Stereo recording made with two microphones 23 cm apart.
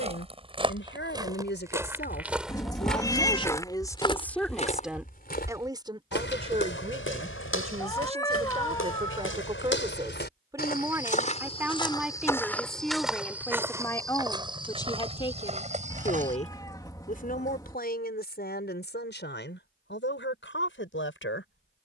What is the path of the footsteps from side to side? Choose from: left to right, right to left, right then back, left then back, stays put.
left then back.